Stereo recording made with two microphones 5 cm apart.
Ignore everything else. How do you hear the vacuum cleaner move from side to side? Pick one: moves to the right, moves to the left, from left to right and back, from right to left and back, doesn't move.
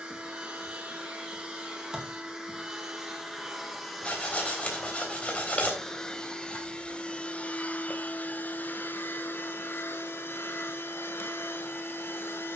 moves to the left.